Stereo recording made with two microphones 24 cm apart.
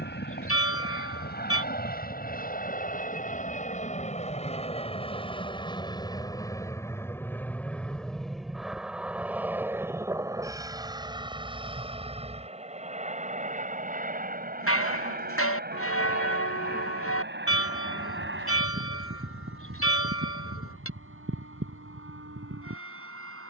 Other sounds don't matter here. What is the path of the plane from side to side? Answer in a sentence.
In this clip you hear the plane go from the left side to the right.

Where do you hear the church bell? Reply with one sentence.
You can hear the church bell on the left.